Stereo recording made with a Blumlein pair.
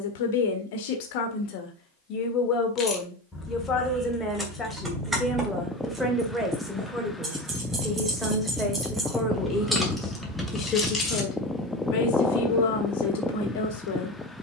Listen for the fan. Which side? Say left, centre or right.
centre.